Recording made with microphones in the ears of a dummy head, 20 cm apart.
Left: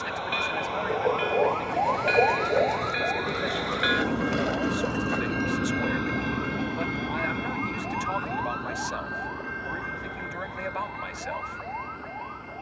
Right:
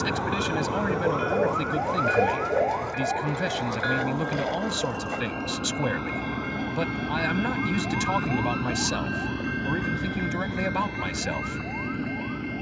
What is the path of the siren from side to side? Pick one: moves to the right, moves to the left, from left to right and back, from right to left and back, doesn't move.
moves to the left.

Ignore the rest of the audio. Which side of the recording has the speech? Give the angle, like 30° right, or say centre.
60° right.